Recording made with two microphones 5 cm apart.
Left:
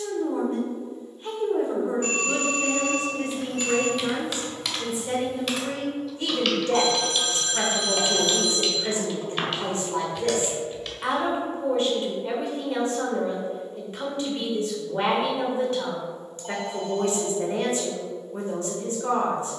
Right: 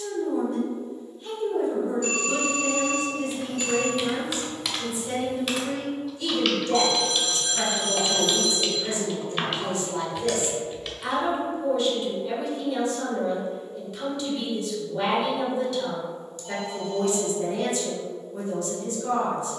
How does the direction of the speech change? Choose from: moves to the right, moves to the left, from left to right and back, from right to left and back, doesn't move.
doesn't move.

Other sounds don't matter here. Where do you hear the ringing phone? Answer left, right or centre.
left.